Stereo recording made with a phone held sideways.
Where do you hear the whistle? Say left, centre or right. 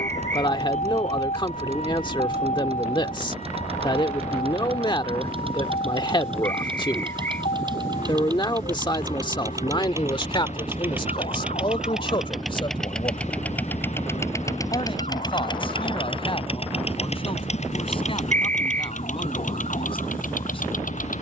right.